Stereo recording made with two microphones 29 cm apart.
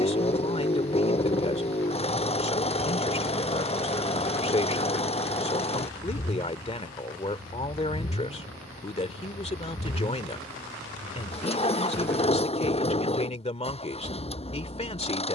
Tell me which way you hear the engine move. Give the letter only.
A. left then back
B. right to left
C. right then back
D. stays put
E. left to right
D.